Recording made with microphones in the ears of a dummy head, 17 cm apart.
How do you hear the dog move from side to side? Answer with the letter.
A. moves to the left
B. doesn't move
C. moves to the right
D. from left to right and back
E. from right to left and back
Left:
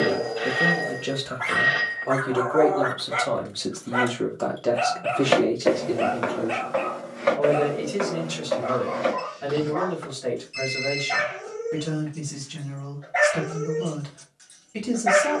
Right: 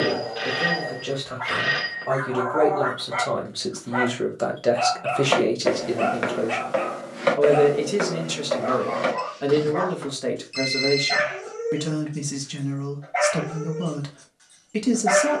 D.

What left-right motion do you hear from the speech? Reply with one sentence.
In this clip you hear the speech move from left to right.